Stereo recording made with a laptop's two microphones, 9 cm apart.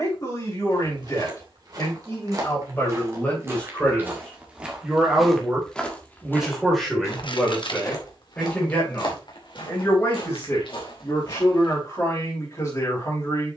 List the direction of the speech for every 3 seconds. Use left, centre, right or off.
left, centre, centre, left, left.